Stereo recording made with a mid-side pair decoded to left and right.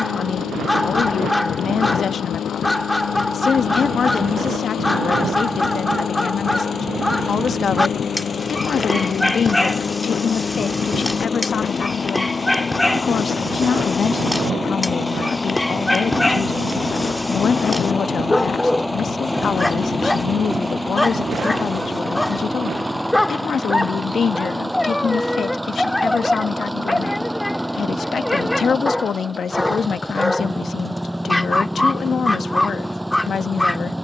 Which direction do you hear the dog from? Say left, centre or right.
centre.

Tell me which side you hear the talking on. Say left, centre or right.
left.